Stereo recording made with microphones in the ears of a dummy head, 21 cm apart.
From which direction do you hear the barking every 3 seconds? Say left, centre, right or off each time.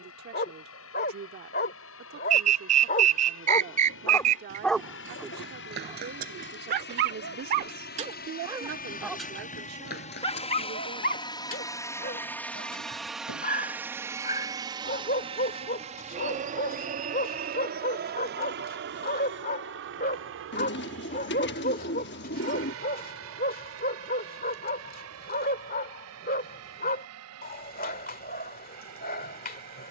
left, centre, right, left, left, left, left, left, left, left.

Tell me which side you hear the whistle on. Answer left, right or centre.
right.